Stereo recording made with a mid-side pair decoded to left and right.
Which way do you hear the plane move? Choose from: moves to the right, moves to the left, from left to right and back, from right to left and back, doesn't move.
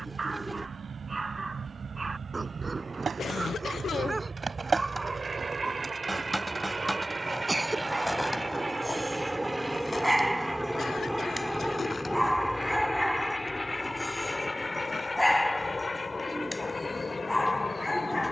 moves to the left.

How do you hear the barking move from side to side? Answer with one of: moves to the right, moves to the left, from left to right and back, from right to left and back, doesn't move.
moves to the left.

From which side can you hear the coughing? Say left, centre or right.
left.